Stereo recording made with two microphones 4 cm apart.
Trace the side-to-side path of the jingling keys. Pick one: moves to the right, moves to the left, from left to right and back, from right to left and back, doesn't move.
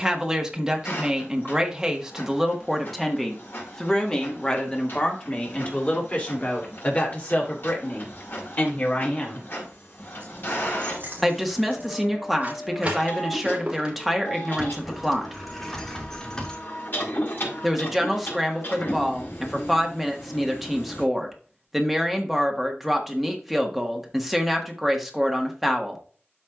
moves to the left.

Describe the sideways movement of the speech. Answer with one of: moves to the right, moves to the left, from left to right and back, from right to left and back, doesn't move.
from right to left and back.